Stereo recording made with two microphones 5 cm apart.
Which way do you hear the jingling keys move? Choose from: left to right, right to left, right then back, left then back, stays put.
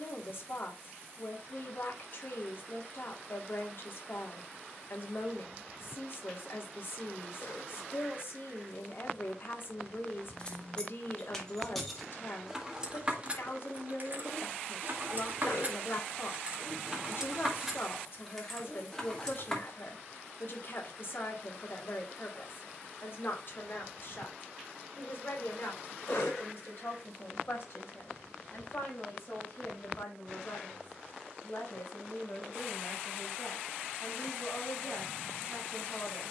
right then back.